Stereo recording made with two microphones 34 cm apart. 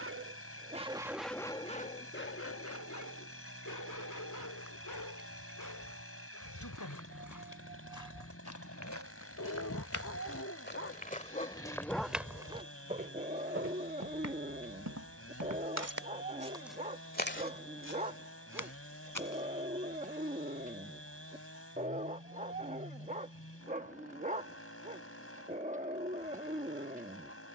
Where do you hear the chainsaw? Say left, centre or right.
left.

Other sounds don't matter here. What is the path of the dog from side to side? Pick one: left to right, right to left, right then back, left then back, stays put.
left then back.